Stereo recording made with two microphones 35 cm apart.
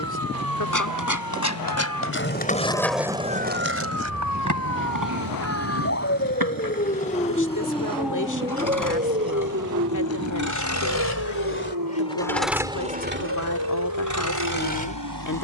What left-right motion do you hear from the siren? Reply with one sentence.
In this clip you hear the siren go from the left side to the right.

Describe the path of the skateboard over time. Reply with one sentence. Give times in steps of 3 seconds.
You can hear the skateboard on the left from 0 s, on the right from 3 s and not at all from 12 s.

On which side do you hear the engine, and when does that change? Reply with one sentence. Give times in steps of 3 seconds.
In this clip you hear the engine on the left from 0 s and on the right from 12 s.